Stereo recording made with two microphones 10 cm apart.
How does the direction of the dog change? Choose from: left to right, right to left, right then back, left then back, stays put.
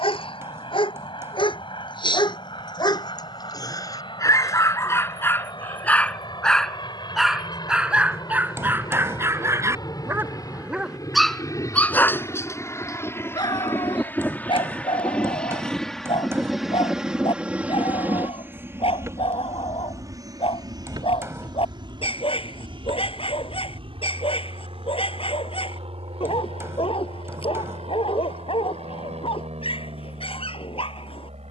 right then back.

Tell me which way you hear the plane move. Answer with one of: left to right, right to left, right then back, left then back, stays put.
left to right.